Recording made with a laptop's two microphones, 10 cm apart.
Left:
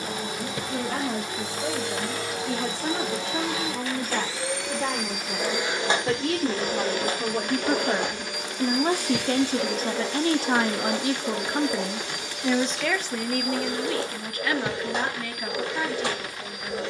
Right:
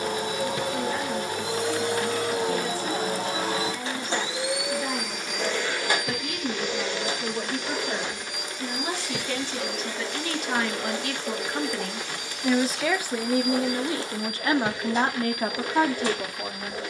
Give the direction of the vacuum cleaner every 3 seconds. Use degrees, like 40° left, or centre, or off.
50° right, 10° right, 50° left, 70° left, 80° left, 80° left.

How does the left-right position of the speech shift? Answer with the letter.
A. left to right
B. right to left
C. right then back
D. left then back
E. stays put
A.